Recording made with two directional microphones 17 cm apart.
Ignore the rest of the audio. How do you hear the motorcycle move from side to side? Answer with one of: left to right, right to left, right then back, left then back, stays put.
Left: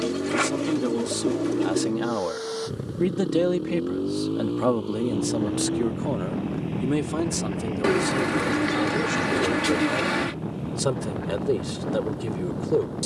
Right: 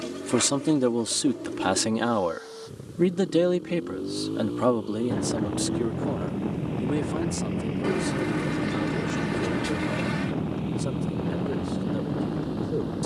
left to right.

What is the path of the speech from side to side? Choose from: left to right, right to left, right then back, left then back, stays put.
right to left.